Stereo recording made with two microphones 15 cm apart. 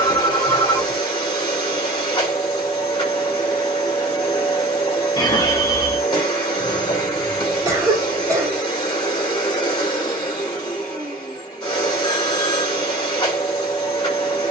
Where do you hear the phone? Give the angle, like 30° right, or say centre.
30° left.